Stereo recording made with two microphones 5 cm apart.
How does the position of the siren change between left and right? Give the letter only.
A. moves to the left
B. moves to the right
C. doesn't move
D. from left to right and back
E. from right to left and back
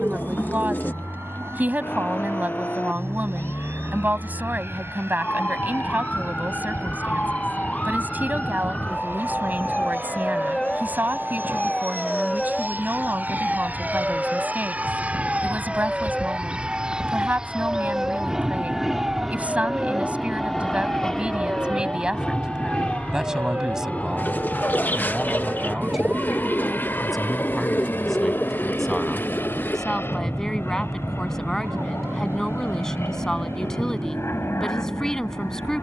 B.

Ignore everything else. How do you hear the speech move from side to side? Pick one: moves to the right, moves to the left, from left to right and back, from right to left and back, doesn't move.
moves to the left.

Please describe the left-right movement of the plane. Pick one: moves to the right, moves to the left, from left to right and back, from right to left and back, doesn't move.
moves to the left.